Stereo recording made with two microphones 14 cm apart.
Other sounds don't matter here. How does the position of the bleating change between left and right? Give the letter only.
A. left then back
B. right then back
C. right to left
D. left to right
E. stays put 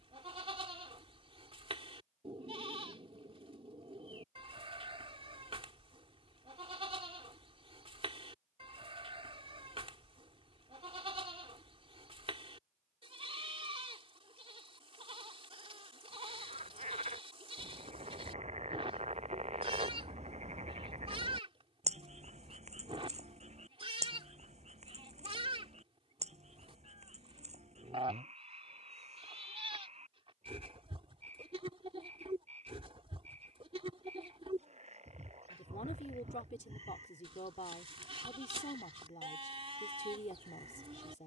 E.